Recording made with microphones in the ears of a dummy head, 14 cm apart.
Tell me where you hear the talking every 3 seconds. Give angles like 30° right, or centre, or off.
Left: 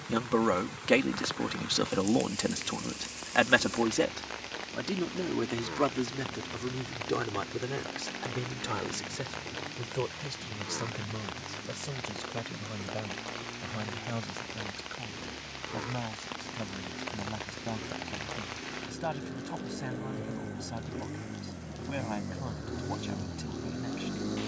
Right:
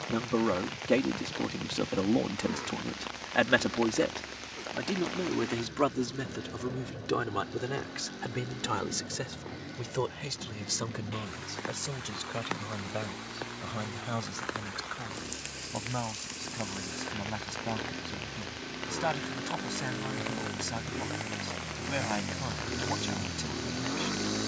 50° left, 10° left, 10° right, 20° right, 30° right, 30° right, 30° right, 30° right.